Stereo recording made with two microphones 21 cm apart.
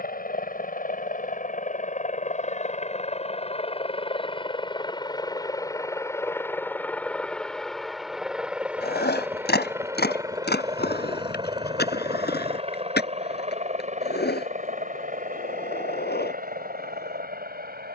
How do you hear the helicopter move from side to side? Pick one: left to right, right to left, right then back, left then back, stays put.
left to right.